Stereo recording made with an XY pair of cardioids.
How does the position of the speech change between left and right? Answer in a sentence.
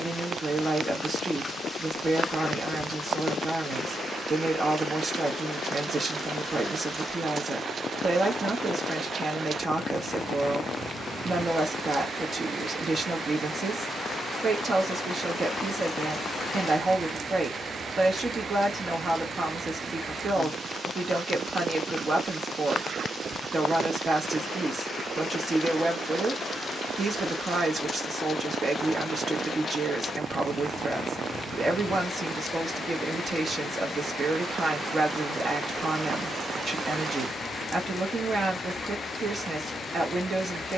In this clip you hear the speech stay put.